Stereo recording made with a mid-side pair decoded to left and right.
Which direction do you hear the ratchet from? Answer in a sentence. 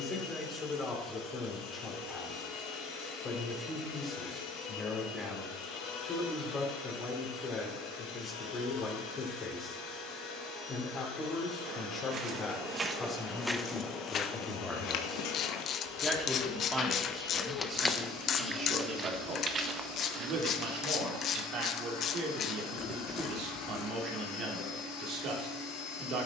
In this clip you hear the ratchet on the left.